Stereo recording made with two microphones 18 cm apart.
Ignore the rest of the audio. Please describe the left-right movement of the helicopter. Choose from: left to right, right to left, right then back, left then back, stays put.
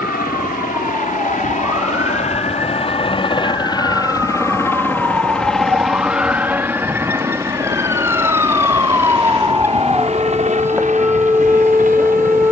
left to right.